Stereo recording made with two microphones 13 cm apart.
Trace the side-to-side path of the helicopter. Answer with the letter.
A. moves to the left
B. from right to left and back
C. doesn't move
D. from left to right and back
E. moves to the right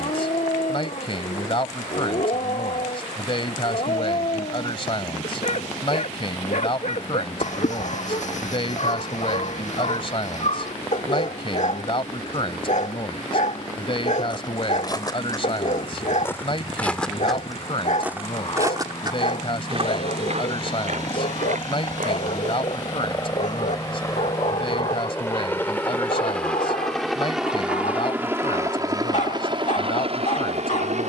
E.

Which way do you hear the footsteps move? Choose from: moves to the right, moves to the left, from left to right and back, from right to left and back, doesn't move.
moves to the right.